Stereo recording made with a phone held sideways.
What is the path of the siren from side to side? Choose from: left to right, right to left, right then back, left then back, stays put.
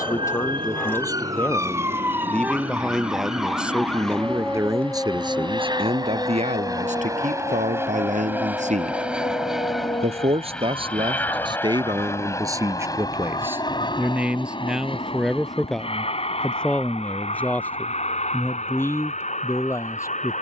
right to left.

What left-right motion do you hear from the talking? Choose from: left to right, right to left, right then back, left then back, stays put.
right then back.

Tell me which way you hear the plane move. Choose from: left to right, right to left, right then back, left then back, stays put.
right to left.